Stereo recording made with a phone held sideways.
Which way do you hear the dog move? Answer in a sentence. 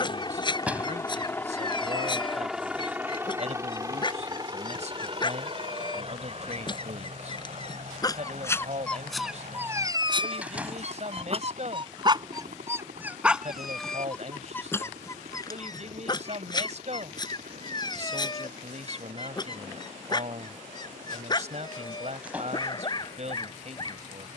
You can hear the dog move from left to right and back again.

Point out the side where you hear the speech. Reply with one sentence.
In this clip you hear the speech on the right.